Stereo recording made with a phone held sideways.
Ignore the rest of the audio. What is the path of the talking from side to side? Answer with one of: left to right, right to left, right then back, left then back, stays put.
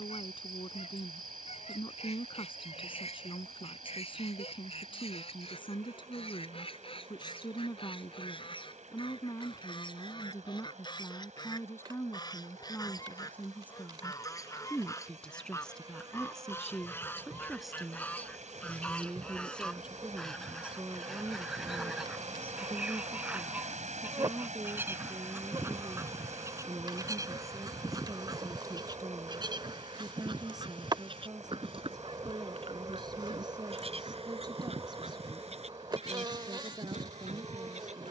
left to right.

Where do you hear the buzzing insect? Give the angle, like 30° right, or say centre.
30° right.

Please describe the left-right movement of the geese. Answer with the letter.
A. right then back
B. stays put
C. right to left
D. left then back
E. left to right
E.